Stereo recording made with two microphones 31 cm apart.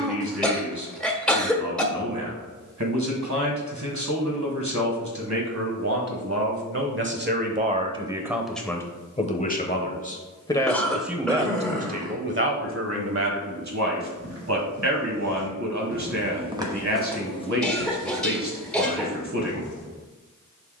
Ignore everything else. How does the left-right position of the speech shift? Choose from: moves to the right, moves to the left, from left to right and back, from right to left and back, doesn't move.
from right to left and back.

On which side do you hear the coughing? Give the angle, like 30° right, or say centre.
centre.